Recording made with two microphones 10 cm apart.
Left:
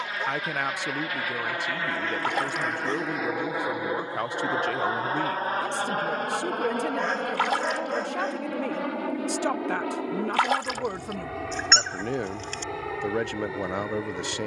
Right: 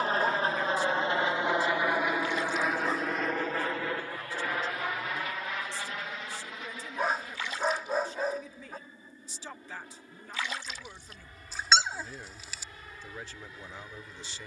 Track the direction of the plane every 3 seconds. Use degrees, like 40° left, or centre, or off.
20° right, 20° left, 50° left, 60° left, 70° left.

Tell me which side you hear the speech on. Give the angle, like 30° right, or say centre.
60° left.